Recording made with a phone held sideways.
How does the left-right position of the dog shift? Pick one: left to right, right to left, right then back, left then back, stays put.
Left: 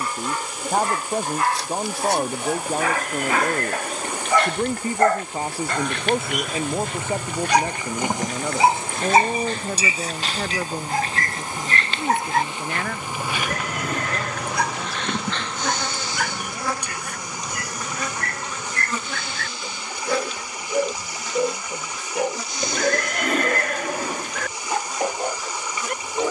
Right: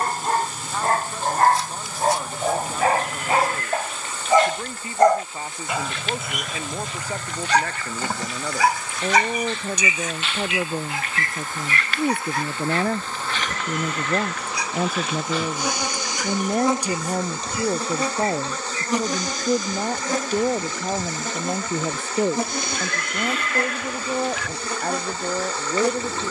right to left.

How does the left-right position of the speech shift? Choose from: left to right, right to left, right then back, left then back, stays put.
left to right.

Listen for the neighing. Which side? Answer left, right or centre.
left.